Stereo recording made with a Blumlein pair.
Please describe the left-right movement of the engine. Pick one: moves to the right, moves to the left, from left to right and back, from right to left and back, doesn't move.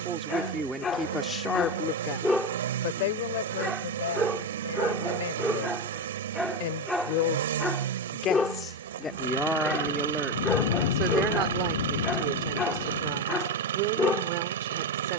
doesn't move.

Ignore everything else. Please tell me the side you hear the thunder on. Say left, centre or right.
left.